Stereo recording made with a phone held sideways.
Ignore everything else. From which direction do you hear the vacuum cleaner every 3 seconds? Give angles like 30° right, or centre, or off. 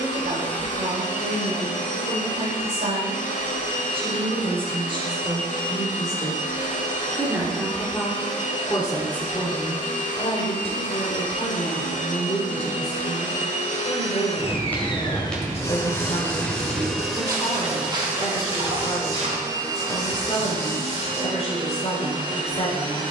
60° left, 60° left, 60° left, 60° left, 50° left, 10° left, 20° right, 40° right.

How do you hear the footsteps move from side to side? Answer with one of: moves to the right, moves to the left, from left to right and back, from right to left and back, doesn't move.
moves to the right.